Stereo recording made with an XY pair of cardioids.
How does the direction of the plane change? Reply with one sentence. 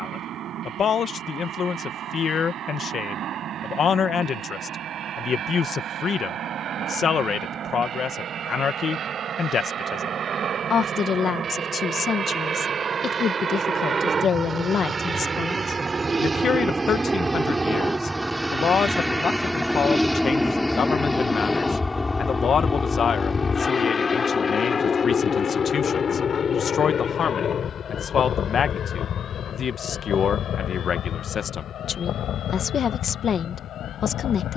In this clip you hear the plane move to the left.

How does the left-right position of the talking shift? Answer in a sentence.
In this clip you hear the talking stay in one place.